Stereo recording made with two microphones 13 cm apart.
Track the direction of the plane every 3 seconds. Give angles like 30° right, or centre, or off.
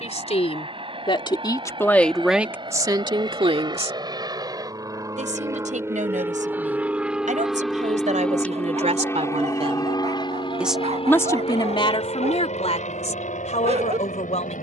50° right, 30° right, centre, 40° left, 60° left.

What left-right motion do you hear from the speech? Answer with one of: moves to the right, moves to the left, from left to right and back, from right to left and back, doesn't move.
from left to right and back.